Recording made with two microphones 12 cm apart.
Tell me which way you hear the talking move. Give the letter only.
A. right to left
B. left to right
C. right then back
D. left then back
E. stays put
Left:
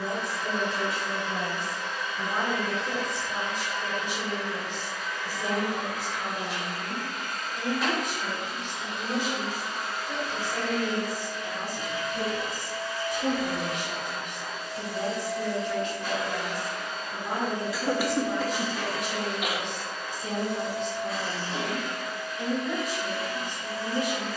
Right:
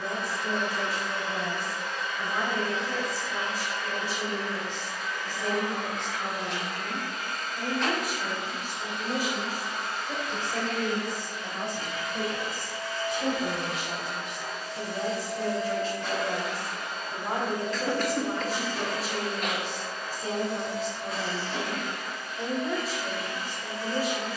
B.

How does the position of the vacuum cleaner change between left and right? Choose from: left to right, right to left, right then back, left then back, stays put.
stays put.